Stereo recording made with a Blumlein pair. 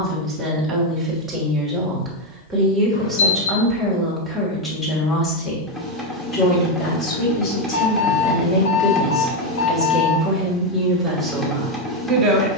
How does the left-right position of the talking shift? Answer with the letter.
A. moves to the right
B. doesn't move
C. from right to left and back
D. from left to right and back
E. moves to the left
C.